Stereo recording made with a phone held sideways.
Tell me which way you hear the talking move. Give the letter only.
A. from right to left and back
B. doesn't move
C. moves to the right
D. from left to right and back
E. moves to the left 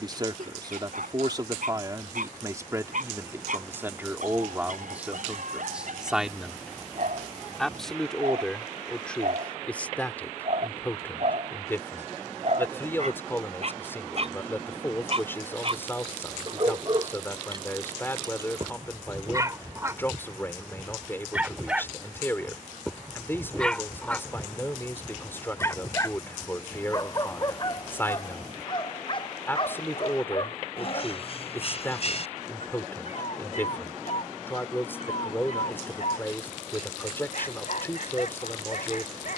E.